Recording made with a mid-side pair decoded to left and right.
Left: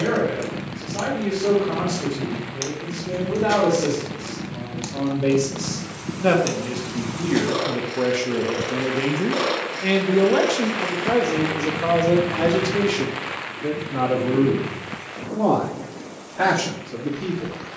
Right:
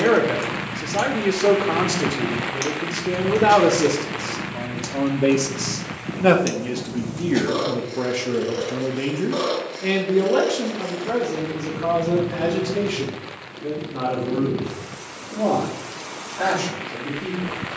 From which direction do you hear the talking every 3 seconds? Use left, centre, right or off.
right, right, centre, left, left, left.